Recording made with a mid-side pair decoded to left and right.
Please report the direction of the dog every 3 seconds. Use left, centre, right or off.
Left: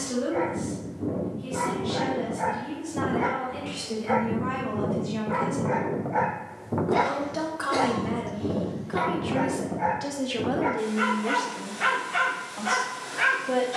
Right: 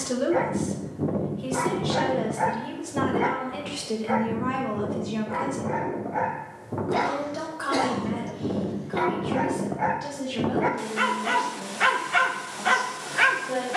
right, centre, centre, right, right.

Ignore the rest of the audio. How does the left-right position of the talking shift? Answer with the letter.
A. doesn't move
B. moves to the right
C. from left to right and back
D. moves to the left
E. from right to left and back
D.